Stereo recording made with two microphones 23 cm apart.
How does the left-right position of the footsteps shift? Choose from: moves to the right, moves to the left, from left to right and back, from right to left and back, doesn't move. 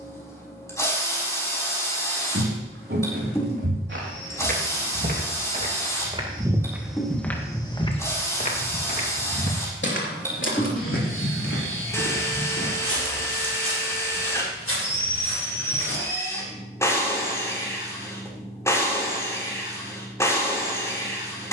moves to the left.